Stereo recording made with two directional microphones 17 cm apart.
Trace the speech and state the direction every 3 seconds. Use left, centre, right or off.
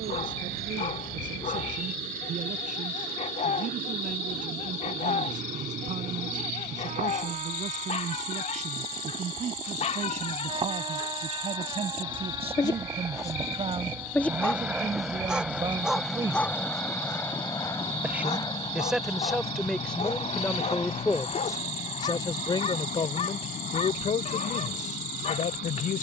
right, right, right, right, right, right, centre, left, left.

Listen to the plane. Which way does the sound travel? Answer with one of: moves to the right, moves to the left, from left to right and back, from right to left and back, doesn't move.
moves to the left.